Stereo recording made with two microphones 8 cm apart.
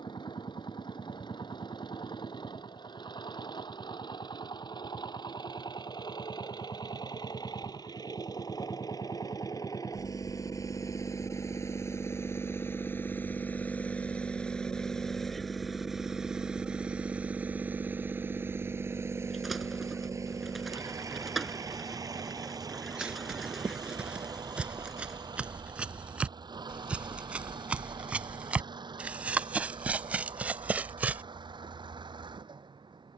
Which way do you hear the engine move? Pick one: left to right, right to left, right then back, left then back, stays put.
left to right.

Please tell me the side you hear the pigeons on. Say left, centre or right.
centre.